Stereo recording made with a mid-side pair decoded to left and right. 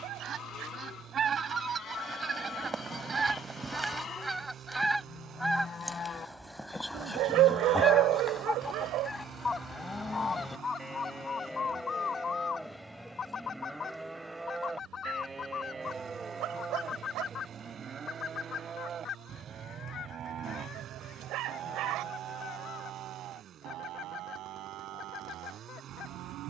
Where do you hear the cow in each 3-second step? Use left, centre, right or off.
left, left, left, centre, centre, right, right, right, right.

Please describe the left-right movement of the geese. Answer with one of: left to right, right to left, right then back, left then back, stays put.
right to left.